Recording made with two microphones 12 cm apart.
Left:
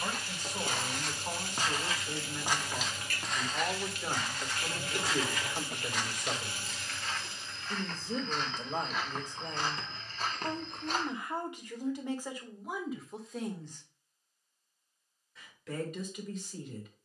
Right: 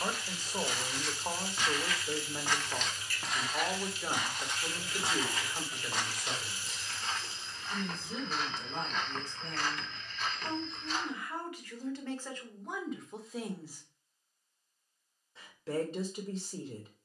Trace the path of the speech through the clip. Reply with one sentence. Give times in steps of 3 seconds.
You can hear the speech on the right from 0 s, in the centre from 3 s, on the left from 6 s, in the centre from 12 s and on the right from 15 s.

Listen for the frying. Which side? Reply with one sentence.
You can hear the frying on the left.